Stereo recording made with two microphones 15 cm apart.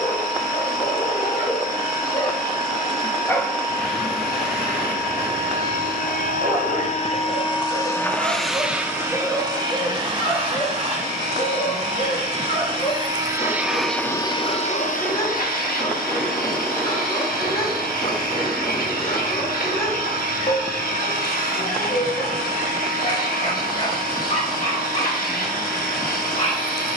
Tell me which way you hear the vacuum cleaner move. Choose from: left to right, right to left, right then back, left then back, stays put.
right then back.